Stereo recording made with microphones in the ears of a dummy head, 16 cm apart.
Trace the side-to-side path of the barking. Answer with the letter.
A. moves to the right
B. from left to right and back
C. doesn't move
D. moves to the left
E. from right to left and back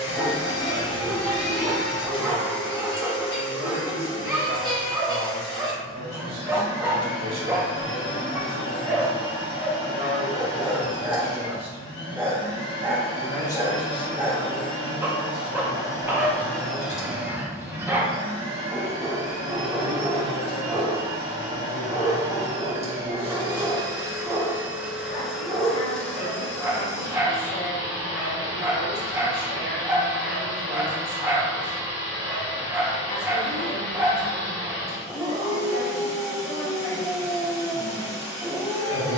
C.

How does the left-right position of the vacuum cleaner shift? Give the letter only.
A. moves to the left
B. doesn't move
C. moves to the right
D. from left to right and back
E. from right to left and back
D.